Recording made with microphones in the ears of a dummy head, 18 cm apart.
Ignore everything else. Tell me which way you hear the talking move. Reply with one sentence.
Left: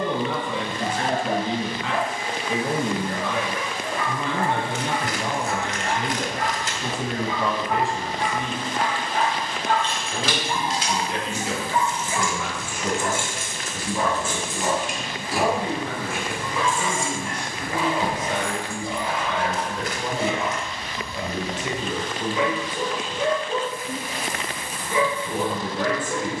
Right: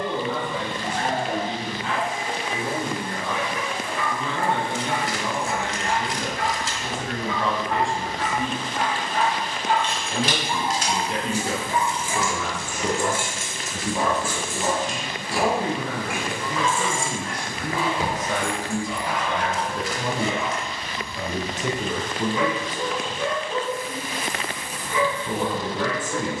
In this clip you hear the talking move to the right.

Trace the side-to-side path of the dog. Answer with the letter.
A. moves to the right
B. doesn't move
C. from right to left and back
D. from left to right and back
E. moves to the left
D.